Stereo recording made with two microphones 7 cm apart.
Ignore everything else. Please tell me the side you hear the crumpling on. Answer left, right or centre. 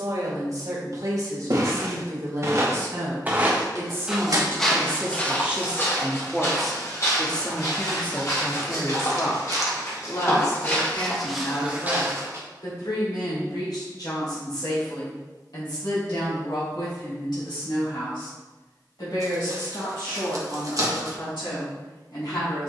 right.